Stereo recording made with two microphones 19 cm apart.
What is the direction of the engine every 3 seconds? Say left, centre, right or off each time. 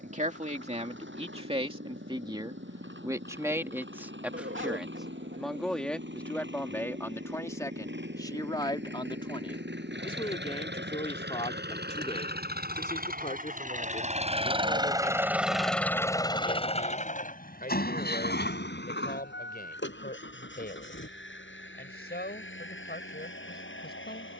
right, right, right, right, right, left, left, left.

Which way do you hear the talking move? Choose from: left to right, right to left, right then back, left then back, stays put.
right to left.